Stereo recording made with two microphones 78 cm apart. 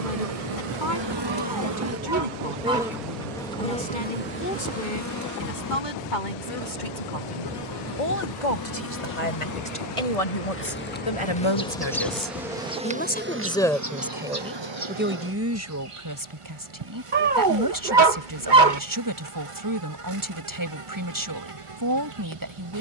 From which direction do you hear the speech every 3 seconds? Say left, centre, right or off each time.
left, left, left, left, centre, right, right, right.